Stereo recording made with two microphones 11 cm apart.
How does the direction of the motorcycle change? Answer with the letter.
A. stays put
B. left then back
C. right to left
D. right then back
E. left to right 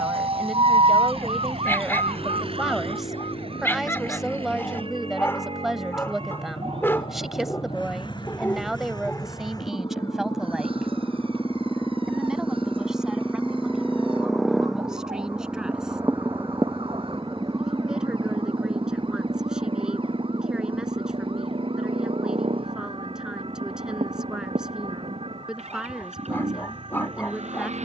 E.